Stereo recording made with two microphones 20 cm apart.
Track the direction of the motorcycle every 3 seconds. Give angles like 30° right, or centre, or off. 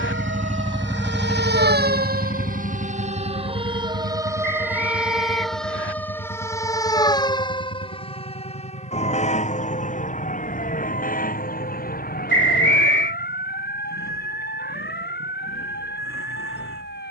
centre, 60° left, 70° left, 70° left, 80° left, 80° left.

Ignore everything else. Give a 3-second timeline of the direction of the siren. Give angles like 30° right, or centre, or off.
50° right, 10° right, 20° left, 40° left, 50° left, 50° left.